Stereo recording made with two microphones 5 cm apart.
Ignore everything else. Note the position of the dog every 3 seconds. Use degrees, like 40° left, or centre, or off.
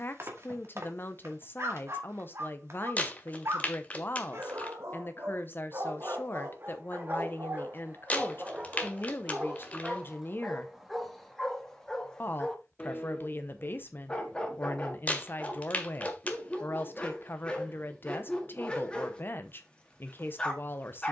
60° right, 60° right, 40° right, centre, 20° left, 20° left, 20° left.